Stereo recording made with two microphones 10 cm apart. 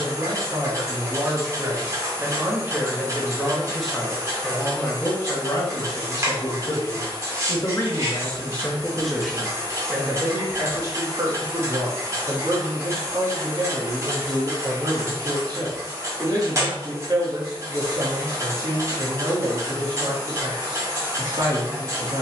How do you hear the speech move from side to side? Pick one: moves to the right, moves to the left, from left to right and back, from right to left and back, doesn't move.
from right to left and back.